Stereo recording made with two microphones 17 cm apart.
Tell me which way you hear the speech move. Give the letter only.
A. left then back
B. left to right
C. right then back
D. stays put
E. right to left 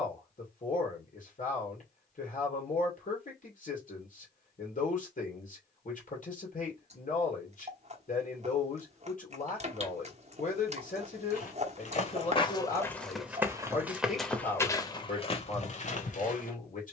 D.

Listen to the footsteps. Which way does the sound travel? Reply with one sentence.
You can hear the footsteps go right and come back.